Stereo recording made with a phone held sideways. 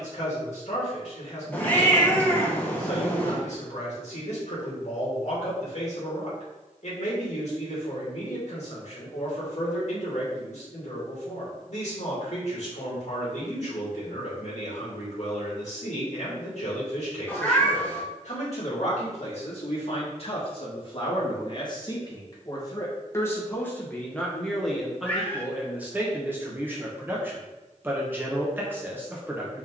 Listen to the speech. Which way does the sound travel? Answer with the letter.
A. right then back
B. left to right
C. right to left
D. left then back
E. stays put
B.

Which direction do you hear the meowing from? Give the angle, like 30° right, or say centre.
10° left.